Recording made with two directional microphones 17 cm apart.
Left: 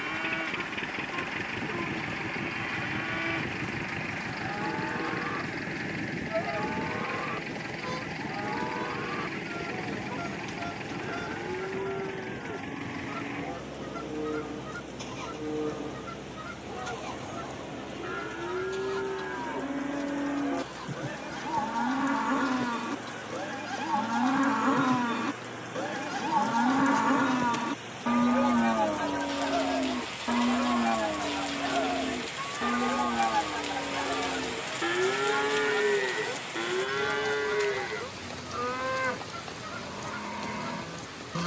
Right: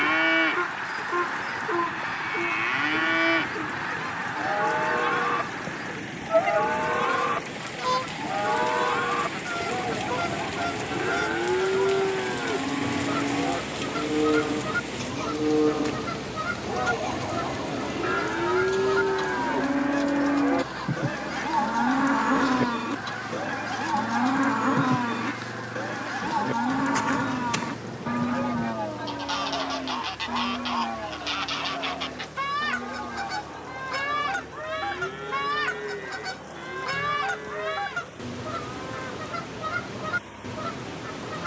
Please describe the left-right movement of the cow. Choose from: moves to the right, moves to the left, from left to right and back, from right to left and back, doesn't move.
moves to the left.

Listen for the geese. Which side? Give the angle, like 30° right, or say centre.
50° right.